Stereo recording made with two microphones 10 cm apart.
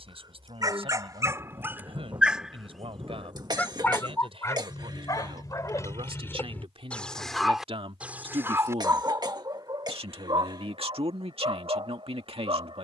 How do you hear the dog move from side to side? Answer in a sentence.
In this clip you hear the dog move from right to left and back again.